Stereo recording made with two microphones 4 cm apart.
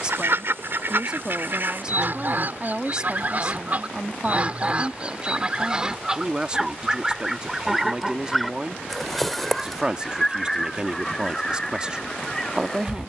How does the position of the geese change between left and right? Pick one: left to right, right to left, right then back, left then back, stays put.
right to left.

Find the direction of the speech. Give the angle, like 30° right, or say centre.
20° right.